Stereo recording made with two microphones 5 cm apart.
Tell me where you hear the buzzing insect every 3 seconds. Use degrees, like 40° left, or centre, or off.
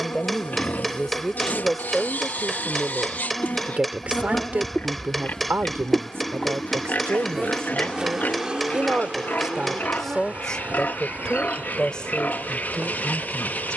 60° left, 30° left, 10° right, 30° right, 40° right.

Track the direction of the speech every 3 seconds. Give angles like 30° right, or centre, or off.
centre, 30° right, 50° right, 10° left, 20° left.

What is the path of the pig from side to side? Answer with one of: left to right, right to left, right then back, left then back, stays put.
stays put.